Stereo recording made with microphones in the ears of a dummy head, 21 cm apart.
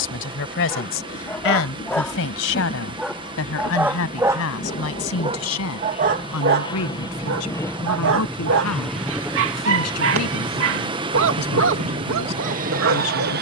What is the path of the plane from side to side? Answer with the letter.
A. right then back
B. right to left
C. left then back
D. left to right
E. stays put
D.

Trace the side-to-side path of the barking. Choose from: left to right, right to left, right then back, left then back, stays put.
left to right.